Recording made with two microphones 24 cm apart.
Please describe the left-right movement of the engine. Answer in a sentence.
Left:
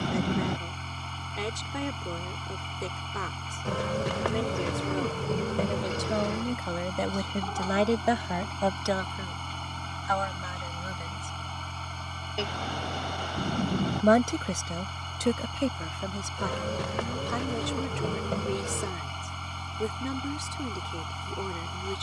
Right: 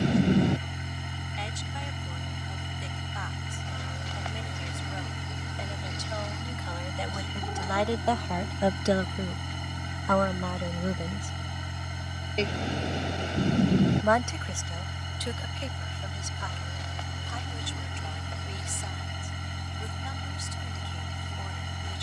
You can hear the engine stay in one place.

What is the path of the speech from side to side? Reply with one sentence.
You can hear the speech go right and come back.